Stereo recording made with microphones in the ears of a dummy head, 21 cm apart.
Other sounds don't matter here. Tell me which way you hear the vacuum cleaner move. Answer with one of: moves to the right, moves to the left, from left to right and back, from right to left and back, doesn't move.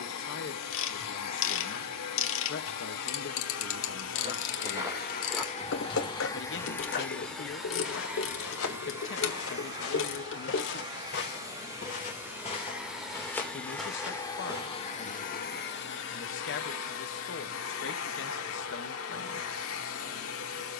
from left to right and back.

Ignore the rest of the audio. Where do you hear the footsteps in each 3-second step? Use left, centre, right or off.
off, centre, left, left, centre, off, off.